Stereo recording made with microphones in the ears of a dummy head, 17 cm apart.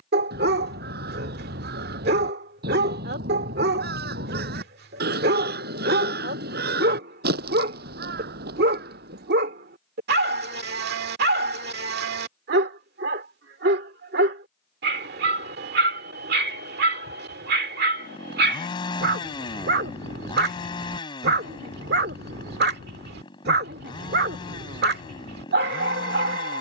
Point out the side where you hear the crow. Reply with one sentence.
You can hear the crow on the right.